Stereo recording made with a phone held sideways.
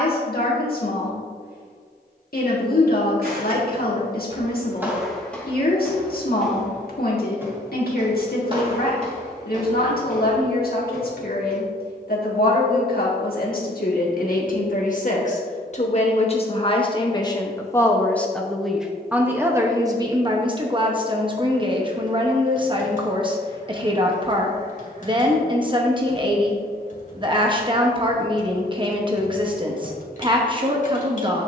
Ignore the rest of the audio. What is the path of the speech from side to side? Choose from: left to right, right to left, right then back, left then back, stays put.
left to right.